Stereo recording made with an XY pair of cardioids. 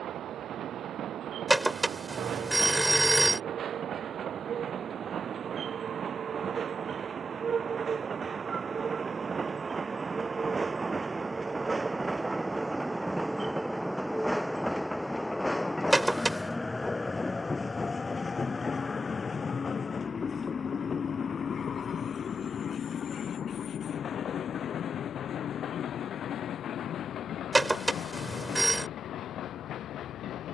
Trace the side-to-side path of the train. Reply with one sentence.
You can hear the train move to the left.